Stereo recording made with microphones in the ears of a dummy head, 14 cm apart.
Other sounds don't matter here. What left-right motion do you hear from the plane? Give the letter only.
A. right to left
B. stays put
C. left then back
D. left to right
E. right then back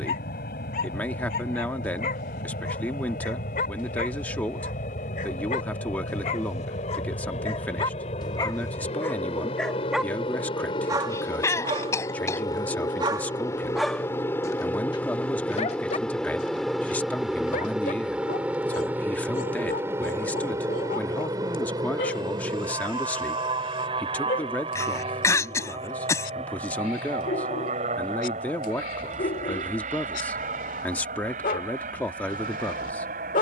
D.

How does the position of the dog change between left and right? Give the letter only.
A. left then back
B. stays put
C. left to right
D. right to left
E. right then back
E.